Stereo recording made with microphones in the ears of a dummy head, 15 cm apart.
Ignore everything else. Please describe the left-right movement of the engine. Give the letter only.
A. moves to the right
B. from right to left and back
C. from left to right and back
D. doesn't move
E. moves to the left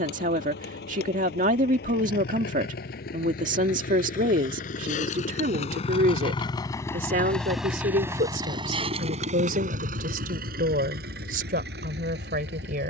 A.